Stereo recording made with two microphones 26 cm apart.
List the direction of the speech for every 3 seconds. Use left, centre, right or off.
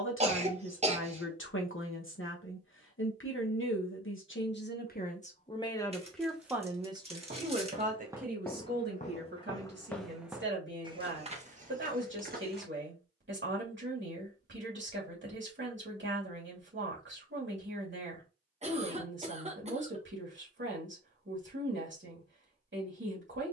left, left, right, right, right, right, right, right.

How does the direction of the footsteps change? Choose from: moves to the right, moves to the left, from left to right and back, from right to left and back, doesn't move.
from right to left and back.